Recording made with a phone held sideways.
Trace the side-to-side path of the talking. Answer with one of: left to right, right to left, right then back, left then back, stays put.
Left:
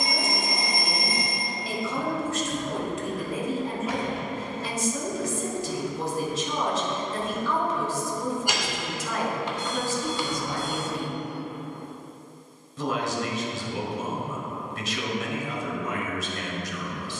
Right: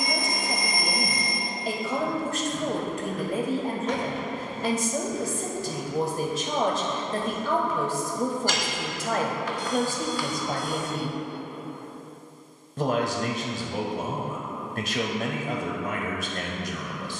stays put.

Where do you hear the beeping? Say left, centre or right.
left.